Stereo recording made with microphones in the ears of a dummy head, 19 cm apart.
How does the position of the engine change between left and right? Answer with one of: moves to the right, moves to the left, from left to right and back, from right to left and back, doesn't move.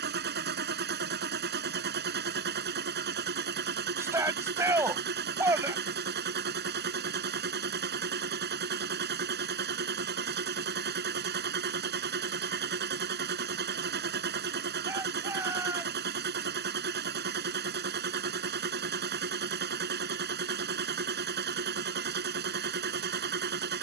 doesn't move.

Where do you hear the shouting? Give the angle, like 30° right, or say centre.
10° right.